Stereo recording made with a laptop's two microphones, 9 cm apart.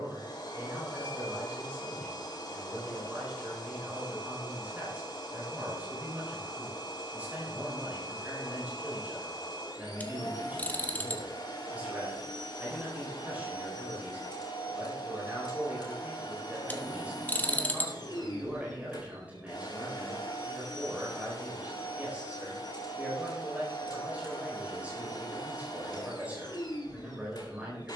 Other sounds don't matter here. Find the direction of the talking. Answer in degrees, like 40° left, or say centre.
20° right.